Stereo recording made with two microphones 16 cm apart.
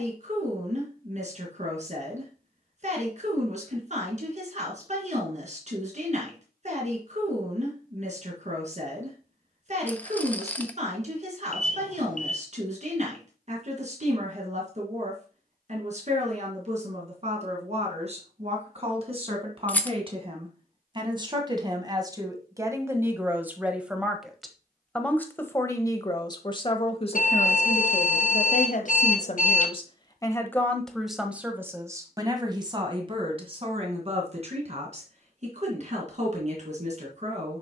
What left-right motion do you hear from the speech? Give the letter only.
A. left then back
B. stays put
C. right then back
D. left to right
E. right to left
A.